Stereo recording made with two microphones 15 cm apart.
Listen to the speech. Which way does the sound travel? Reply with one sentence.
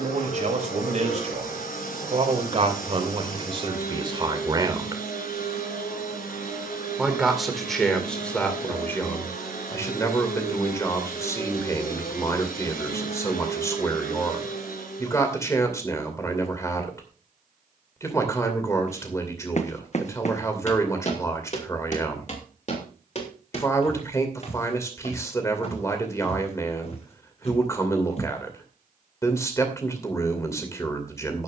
You can hear the speech move to the left.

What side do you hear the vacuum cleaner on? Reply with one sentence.
In this clip you hear the vacuum cleaner on the left.